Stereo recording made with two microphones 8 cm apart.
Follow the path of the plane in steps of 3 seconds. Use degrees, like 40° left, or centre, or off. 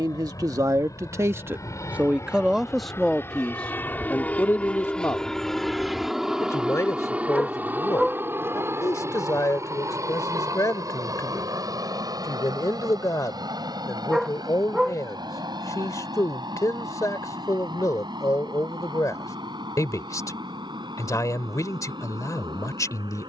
50° left, 20° left, 20° right, 40° right, 60° right, 60° right, 70° right, 70° right.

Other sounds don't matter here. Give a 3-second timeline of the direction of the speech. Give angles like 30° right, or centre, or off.
30° right, 20° left, 50° left, 50° left, 50° left, 50° left, 50° left, 50° left.